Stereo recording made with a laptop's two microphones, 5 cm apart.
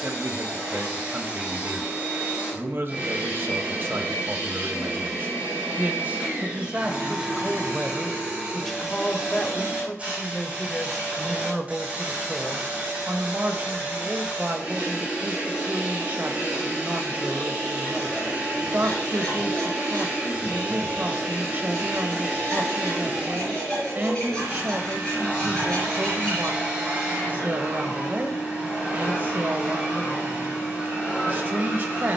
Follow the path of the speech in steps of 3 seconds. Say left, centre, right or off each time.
right, right, centre, centre, right, right, right, right, right, right, right.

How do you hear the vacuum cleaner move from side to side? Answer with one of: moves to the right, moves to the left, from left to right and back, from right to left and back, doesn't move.
doesn't move.